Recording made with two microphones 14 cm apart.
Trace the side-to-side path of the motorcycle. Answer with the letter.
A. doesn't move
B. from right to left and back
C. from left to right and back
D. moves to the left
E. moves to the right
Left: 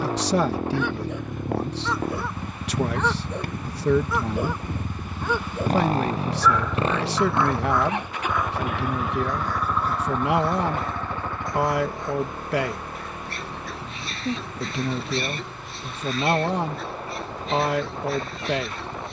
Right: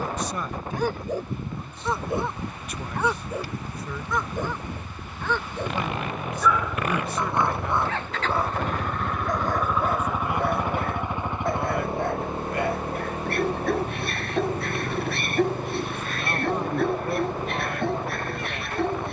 E.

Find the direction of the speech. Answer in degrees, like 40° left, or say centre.
80° left.